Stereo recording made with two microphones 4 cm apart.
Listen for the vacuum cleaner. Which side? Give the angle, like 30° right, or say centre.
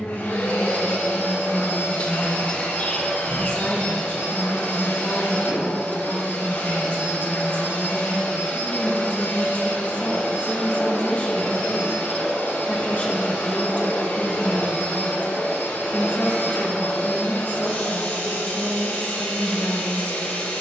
70° left.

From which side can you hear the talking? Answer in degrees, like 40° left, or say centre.
30° left.